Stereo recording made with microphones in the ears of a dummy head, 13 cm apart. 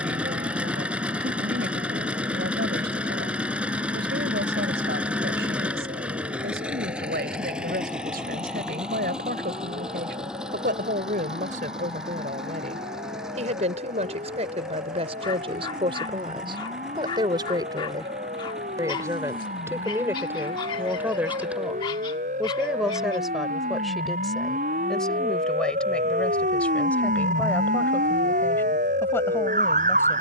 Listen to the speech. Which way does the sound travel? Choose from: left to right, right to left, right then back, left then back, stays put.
right to left.